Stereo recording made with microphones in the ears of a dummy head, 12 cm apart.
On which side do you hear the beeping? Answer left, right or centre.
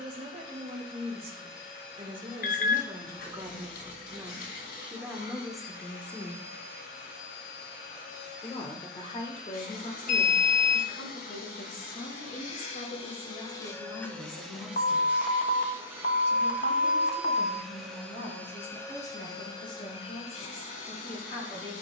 left.